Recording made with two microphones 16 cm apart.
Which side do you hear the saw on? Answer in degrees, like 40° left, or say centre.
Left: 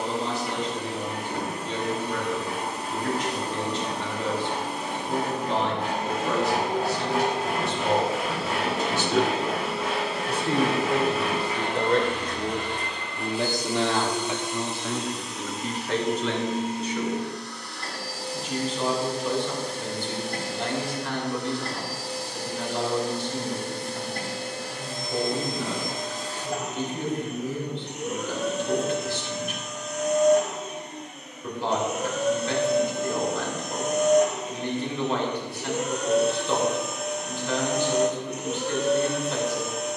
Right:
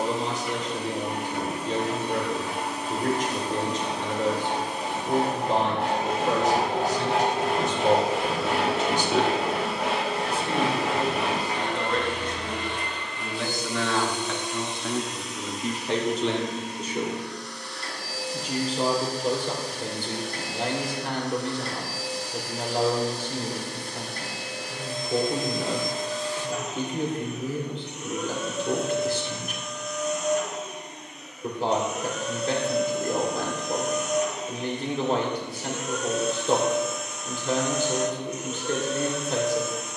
80° right.